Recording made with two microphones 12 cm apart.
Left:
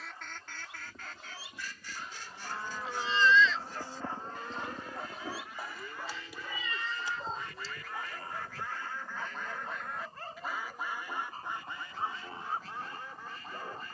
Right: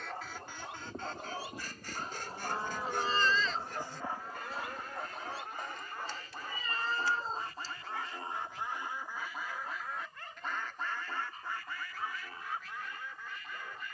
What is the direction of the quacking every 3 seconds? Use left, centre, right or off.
right, right, right, centre, left.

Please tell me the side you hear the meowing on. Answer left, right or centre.
right.